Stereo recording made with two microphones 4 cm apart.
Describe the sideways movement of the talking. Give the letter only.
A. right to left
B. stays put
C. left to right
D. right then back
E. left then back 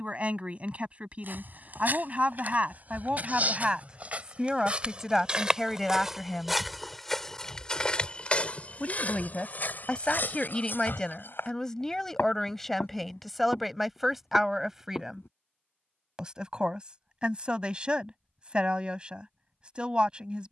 E.